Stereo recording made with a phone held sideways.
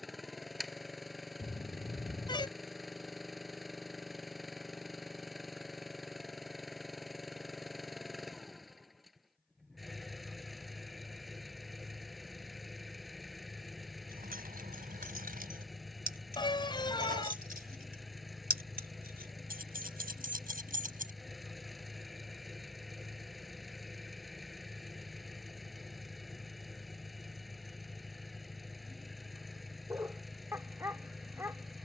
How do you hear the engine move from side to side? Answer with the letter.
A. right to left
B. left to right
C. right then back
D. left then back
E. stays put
E.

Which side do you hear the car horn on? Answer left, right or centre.
left.